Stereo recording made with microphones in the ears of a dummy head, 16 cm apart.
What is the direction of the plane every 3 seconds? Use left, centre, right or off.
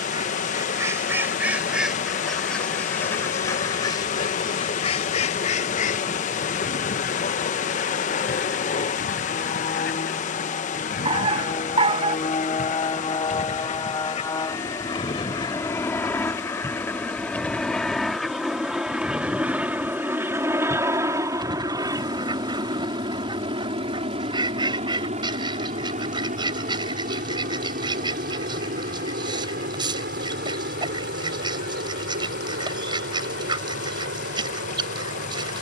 left, left, left, left, left, centre, centre, right, right, right, right, right.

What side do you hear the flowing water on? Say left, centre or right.
left.